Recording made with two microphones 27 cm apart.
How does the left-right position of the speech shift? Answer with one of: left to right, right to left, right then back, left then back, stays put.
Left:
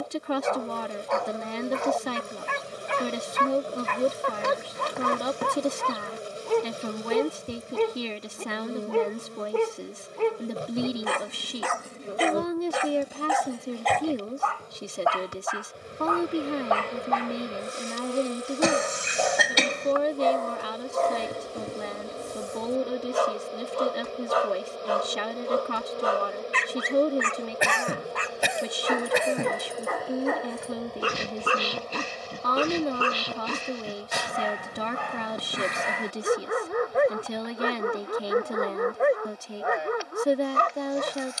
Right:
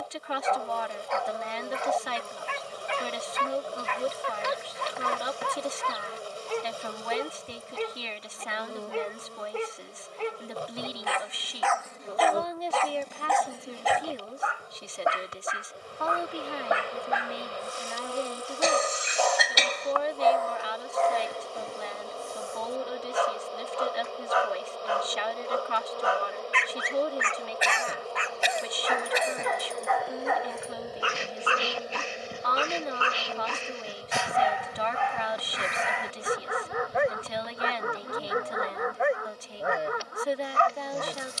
stays put.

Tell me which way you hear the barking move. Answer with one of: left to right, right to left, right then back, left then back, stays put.
right then back.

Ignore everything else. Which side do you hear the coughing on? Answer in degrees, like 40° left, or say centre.
60° left.